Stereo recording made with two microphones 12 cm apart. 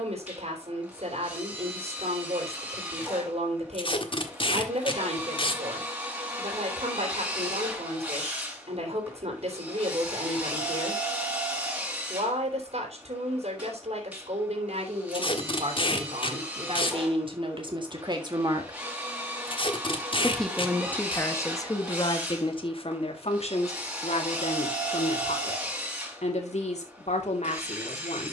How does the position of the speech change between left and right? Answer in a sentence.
You can hear the speech move to the left.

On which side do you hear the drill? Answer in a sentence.
You can hear the drill in the centre.